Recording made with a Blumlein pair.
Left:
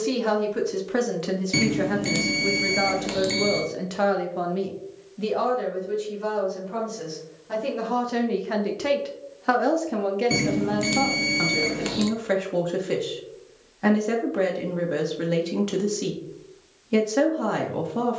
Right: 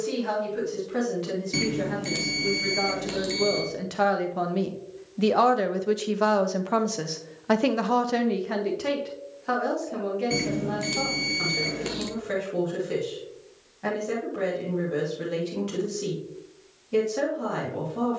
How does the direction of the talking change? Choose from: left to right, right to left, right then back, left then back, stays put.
right then back.